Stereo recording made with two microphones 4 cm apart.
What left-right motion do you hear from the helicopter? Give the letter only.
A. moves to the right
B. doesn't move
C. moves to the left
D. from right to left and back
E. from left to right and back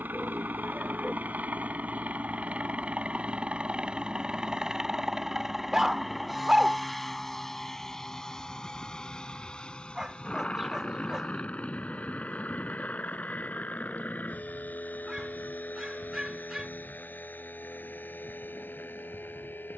C.